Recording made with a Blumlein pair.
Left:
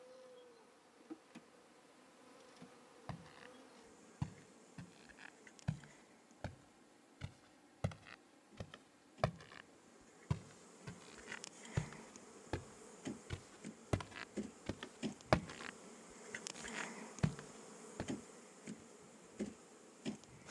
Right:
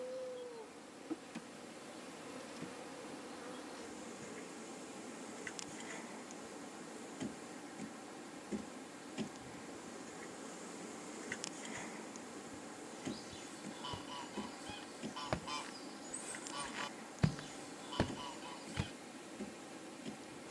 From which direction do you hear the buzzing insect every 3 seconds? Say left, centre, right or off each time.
right, right, right, right, centre, centre, centre.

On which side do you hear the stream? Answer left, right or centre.
right.